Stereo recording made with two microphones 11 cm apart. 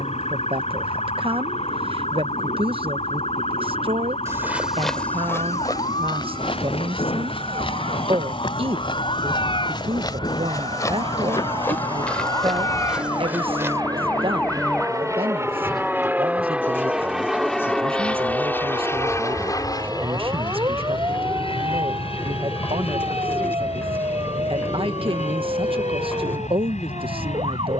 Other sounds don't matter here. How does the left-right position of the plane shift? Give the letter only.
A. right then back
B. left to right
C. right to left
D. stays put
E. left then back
C.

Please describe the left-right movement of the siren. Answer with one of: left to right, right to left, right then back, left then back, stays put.
left to right.